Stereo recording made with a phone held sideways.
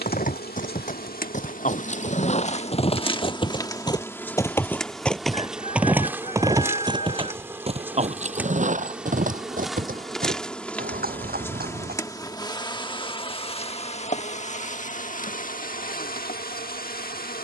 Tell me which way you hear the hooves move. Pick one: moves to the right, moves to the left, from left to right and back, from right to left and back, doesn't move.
moves to the right.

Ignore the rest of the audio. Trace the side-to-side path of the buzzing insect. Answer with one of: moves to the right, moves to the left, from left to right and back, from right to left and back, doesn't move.
from left to right and back.